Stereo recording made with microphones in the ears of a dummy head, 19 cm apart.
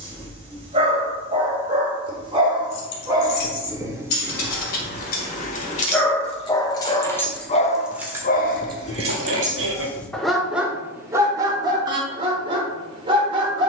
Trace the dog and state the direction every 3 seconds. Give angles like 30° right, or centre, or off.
20° right, 10° right, 30° left, centre, 20° right.